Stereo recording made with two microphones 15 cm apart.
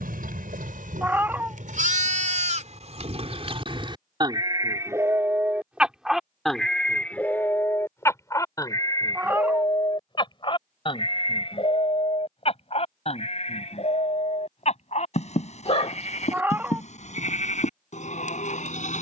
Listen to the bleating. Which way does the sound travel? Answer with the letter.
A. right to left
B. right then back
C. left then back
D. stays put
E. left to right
A.